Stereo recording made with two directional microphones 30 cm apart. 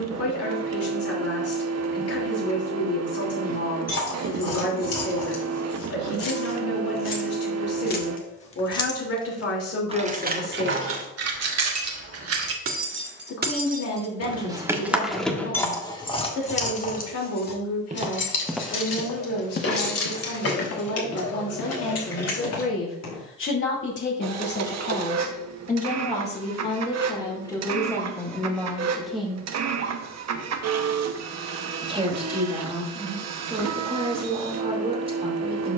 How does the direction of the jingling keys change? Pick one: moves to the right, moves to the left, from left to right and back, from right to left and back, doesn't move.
from left to right and back.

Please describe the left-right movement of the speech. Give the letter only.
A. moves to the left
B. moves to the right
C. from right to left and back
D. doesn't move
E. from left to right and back
B.